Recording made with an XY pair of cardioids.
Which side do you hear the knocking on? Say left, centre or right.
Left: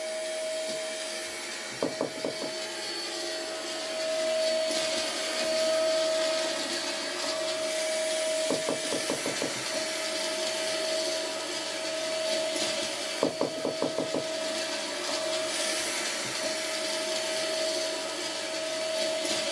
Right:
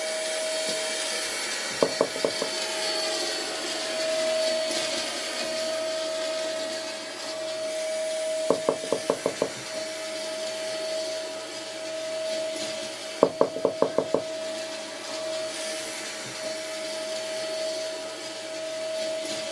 right.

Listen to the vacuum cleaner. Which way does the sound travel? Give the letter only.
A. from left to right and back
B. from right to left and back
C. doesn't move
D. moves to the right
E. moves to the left
E.